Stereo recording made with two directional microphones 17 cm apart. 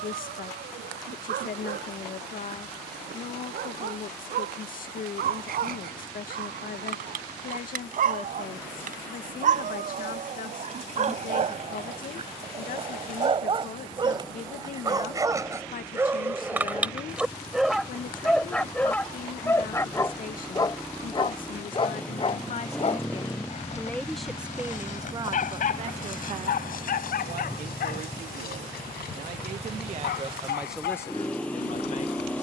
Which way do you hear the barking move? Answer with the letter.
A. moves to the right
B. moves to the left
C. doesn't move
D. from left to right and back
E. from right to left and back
B.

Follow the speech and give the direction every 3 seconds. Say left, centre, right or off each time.
left, left, left, left, left, left, left, left, right, right, centre.